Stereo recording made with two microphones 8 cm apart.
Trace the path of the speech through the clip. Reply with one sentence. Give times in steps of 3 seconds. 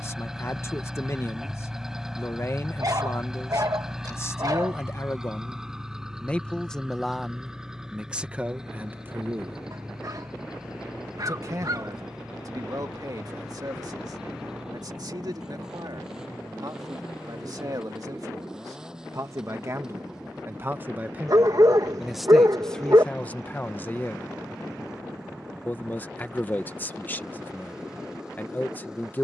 You can hear the speech on the left from 0 s, in the centre from 6 s, on the right from 9 s, in the centre from 21 s and on the left from 24 s.